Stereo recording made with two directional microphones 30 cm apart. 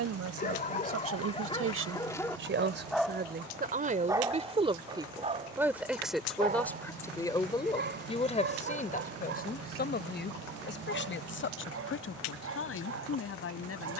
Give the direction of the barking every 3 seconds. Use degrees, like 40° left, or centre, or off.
20° left, 10° right, 40° right, 50° right, 50° right.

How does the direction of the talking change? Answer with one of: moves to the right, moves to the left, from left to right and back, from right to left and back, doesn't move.
moves to the left.